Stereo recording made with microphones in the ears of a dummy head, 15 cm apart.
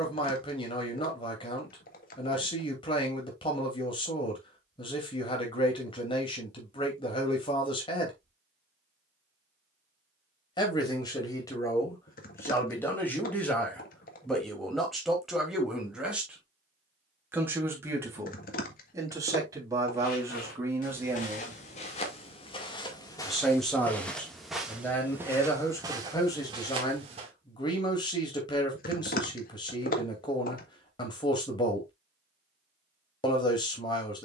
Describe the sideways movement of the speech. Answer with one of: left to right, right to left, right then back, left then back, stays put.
right then back.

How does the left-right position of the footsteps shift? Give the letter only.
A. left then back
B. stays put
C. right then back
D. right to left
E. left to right
E.